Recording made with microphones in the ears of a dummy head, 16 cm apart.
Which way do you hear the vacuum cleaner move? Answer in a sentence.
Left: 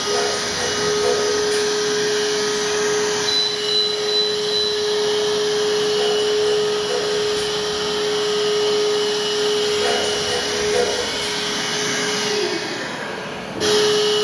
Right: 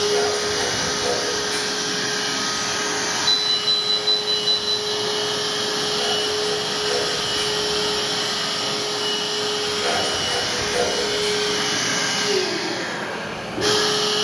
You can hear the vacuum cleaner go right and come back.